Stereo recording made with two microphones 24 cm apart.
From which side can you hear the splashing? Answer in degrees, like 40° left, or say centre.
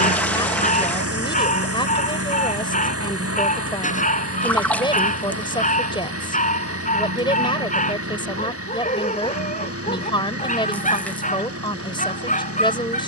10° left.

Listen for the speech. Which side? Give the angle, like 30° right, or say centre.
20° left.